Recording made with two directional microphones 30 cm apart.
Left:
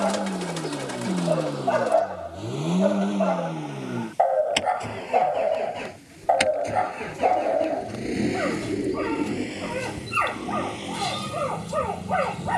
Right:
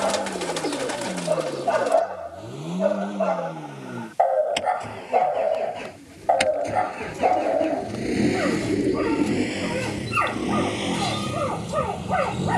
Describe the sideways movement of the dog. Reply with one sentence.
You can hear the dog stay put.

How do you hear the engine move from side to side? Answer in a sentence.
In this clip you hear the engine move to the right.